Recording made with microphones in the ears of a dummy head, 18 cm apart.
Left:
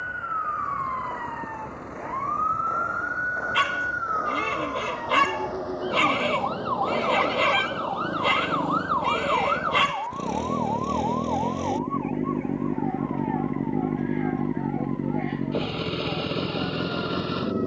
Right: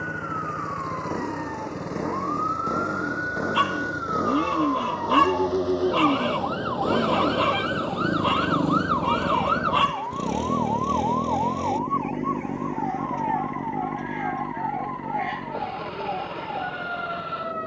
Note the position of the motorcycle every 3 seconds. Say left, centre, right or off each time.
right, right, right, centre, left, left.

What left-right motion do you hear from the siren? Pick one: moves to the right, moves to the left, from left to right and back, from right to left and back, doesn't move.
moves to the right.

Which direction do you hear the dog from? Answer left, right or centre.
left.